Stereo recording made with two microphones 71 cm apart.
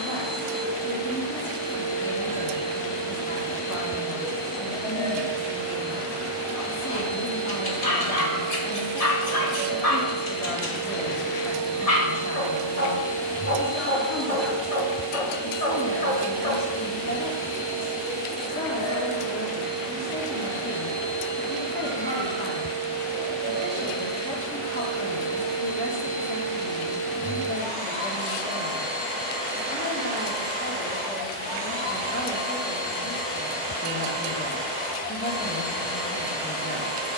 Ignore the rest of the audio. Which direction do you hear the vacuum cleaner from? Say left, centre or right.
right.